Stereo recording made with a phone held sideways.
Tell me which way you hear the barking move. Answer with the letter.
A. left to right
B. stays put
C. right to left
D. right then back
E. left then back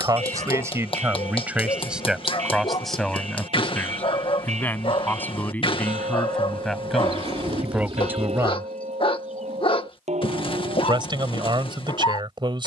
B.